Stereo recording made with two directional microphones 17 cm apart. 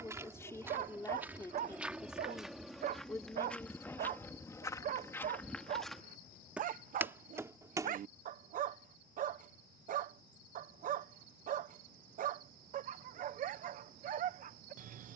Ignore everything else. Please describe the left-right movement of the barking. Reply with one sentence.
You can hear the barking stay in one place.